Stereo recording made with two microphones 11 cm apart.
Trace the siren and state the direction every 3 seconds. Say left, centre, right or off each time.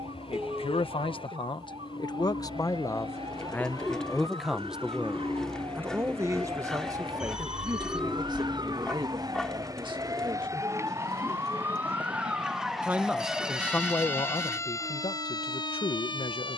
right, right, right, right, centre, left.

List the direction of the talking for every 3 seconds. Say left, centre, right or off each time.
left, centre, right, right, left, left.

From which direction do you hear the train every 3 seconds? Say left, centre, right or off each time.
left, left, centre, right, right, right.